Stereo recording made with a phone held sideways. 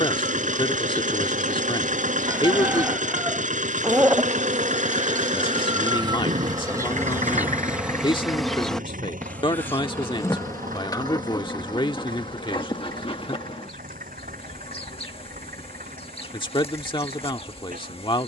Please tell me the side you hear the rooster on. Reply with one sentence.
In this clip you hear the rooster in the centre.